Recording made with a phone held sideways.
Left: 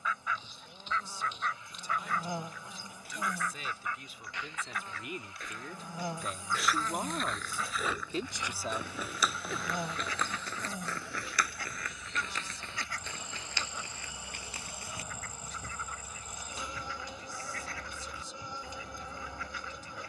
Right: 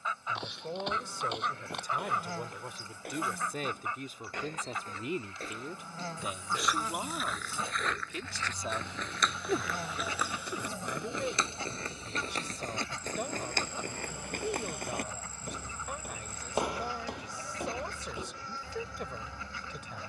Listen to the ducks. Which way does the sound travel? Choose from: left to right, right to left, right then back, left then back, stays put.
stays put.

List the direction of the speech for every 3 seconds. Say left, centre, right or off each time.
right, right, centre, right, right, right, right.